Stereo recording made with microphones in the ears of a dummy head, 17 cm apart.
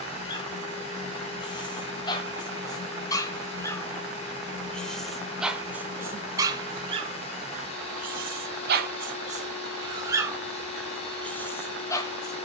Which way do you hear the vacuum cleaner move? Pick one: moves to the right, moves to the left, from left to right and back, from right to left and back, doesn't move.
doesn't move.